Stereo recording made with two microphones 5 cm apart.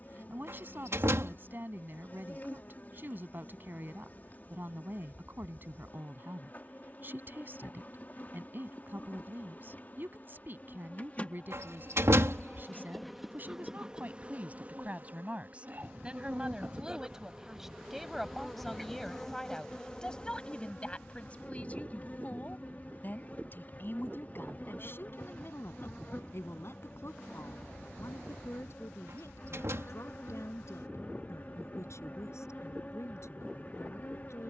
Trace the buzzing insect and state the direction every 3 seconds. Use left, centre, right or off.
left, left, left, left, centre, right, centre, left, left, left, left, left.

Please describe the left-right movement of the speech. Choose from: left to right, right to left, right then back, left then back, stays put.
right to left.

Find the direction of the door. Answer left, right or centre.
right.